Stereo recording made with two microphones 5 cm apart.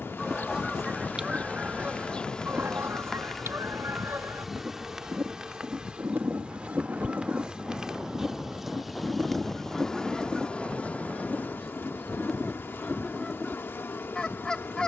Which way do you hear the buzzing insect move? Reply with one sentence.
You can hear the buzzing insect go right and come back.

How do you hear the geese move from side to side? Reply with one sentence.
In this clip you hear the geese move from left to right and back again.